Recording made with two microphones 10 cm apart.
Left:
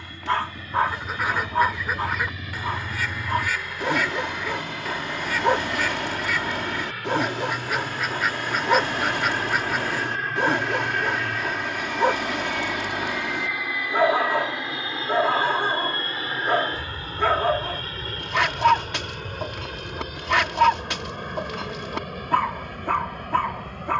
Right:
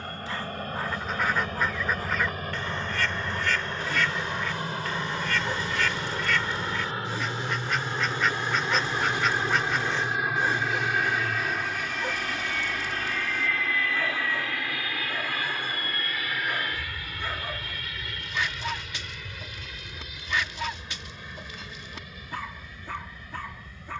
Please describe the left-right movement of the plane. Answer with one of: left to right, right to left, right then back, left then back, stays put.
right to left.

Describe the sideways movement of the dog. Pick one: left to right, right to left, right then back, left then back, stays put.
stays put.